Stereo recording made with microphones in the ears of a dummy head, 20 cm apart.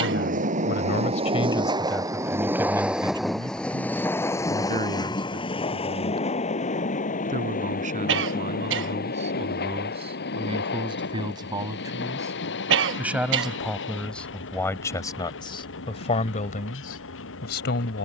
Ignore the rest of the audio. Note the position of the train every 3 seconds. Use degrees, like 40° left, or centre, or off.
20° right, 10° left, 40° left, 50° left, 50° left, 60° left.